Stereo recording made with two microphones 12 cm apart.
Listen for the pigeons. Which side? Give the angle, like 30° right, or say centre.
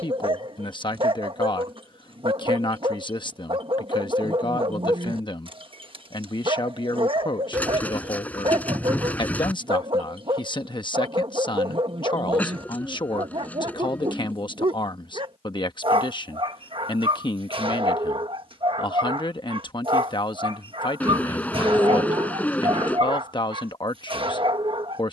10° left.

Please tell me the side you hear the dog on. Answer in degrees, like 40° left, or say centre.
50° right.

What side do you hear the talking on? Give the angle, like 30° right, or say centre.
40° left.